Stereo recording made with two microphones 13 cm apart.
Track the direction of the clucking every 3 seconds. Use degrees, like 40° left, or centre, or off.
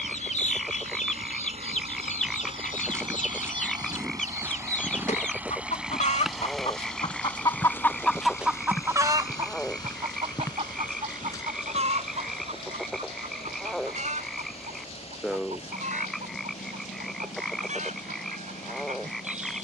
70° left, 70° left, 20° left, 50° right, 70° right, 70° right, 70° right.